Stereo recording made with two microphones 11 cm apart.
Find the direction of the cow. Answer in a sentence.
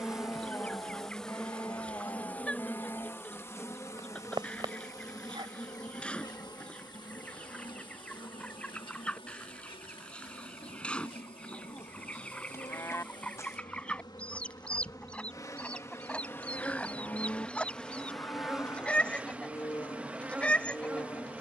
You can hear the cow on the left.